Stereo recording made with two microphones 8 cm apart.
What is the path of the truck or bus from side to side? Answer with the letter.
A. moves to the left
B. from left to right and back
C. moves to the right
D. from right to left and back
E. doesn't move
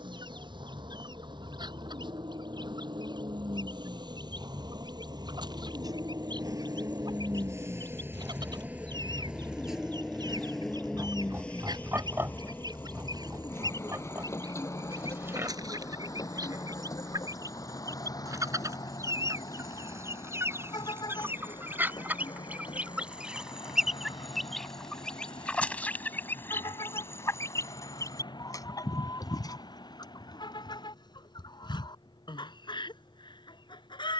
A.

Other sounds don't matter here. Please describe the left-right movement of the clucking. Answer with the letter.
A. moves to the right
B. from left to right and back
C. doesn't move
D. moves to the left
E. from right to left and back
D.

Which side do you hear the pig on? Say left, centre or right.
right.